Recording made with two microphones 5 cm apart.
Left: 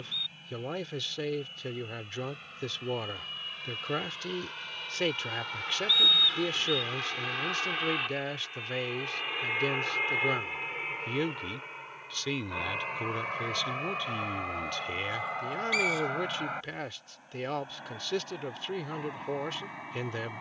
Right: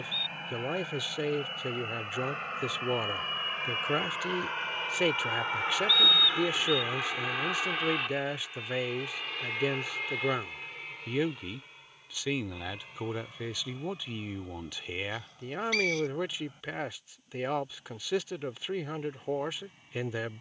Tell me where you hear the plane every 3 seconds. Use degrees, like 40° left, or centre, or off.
50° right, 40° right, 10° right, 30° left, 50° left, 60° left, 70° left.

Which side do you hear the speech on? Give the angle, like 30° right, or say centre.
10° right.